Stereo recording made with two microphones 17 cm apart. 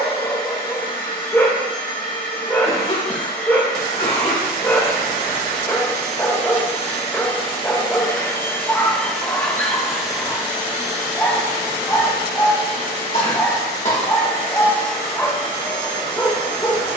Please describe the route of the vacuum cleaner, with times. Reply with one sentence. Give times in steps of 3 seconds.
You can hear the vacuum cleaner on the left from 0 s, in the centre from 9 s and on the right from 12 s.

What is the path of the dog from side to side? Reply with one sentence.
You can hear the dog stay put.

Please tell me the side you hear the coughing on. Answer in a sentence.
In this clip you hear the coughing on the left.